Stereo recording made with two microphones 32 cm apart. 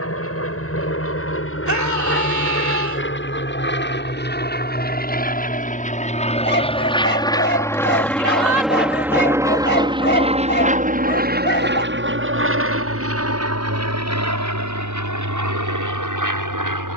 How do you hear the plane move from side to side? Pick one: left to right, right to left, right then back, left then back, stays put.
left to right.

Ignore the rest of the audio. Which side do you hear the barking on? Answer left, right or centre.
left.